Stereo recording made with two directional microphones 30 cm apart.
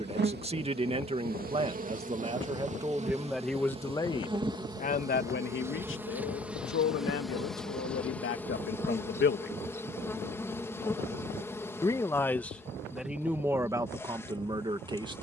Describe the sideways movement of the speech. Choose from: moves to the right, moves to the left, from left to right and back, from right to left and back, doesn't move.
from right to left and back.